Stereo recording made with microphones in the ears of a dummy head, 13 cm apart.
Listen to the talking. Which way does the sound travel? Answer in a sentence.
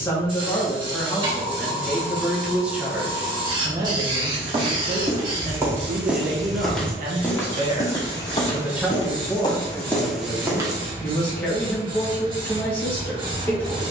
You can hear the talking go right and come back.